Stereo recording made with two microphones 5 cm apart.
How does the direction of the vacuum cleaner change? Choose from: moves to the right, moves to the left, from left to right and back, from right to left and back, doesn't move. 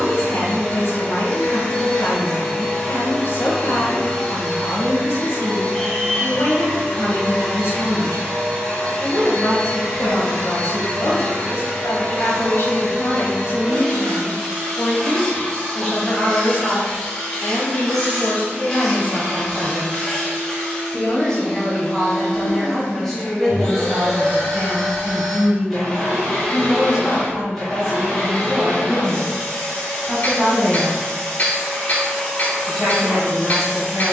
doesn't move.